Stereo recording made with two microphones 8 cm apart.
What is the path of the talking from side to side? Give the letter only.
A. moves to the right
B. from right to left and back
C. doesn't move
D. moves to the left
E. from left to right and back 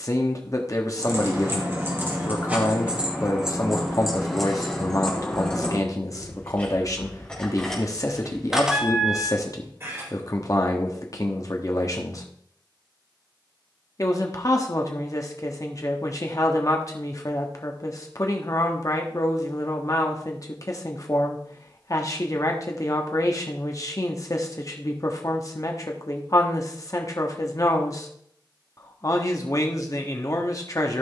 C.